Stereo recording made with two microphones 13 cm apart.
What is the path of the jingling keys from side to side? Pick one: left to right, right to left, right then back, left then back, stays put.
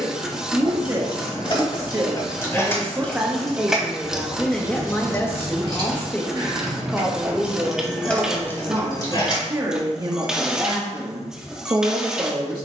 right then back.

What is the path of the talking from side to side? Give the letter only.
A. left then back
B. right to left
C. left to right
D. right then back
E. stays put
A.